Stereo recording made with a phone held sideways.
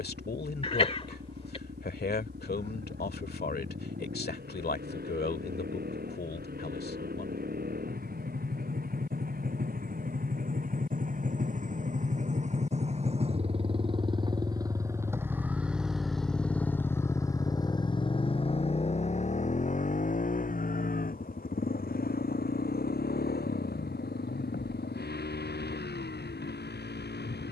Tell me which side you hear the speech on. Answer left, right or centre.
left.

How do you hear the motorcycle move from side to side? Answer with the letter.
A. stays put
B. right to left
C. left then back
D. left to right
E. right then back
B.